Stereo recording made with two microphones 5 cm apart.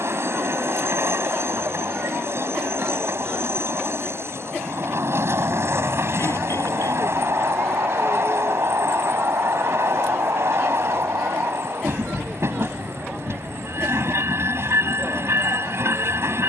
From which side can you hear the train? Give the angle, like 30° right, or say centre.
60° right.